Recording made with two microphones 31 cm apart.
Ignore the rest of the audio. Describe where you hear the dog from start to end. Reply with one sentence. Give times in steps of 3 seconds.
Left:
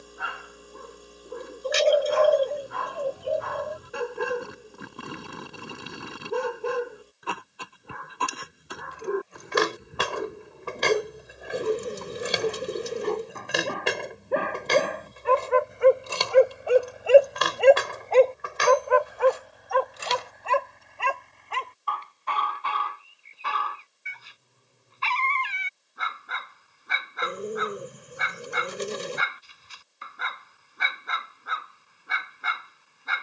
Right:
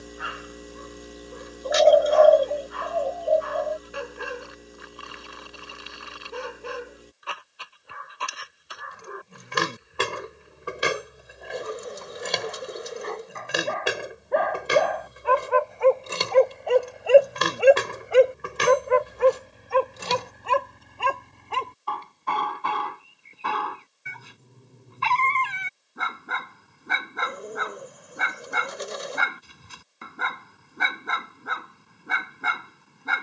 In this clip you hear the dog on the left from 0 s, in the centre from 15 s and on the right from 18 s.